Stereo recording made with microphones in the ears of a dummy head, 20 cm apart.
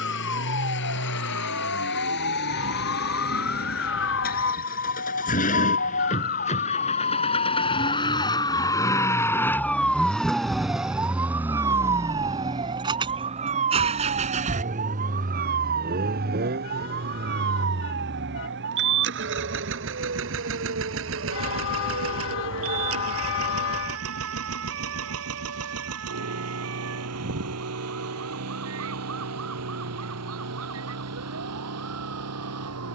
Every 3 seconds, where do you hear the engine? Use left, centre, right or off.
left, left, left, centre, right, right, right, right, right, right, right.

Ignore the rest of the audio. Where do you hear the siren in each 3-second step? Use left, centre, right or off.
left, left, left, centre, right, right, right, right, right, right, right.